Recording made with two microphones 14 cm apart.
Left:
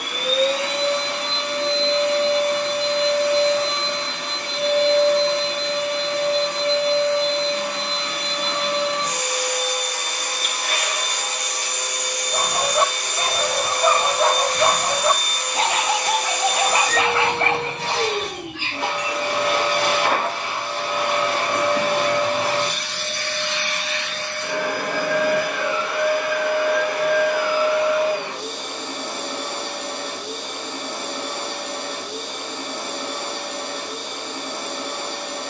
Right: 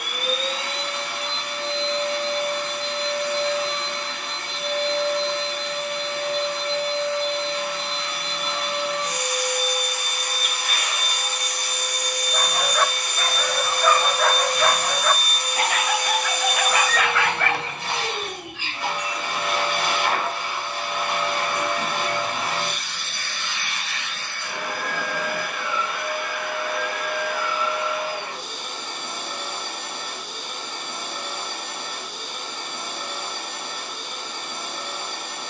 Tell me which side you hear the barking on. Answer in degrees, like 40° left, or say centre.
20° left.